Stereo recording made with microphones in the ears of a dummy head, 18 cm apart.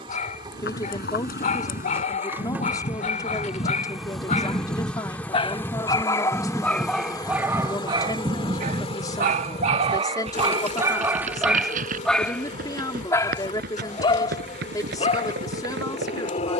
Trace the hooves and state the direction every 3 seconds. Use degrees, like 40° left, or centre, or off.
40° left, 20° left, 10° right, 30° right, 50° right, 60° right.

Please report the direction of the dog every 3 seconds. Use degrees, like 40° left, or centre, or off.
40° left, 30° left, 10° right, 20° right, 20° left, 30° left.